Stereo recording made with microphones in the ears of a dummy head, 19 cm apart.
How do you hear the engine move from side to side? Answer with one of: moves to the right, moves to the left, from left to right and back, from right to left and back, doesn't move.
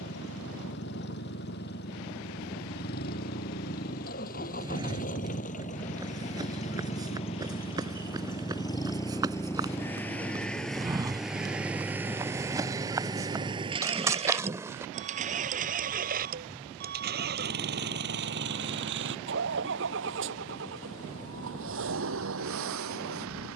moves to the right.